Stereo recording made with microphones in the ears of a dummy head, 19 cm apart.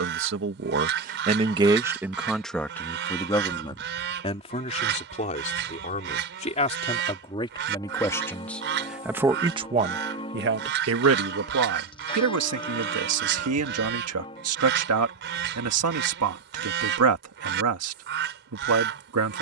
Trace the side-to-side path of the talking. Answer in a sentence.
You can hear the talking go left and come back.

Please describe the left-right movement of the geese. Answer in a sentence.
In this clip you hear the geese stay in one place.